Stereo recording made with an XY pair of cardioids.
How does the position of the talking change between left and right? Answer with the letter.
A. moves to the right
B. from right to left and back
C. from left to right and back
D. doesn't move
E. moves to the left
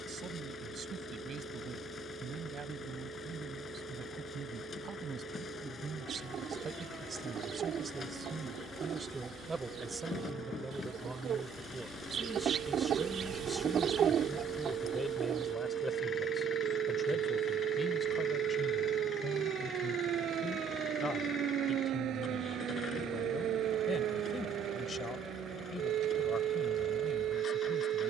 E.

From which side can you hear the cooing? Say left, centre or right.
right.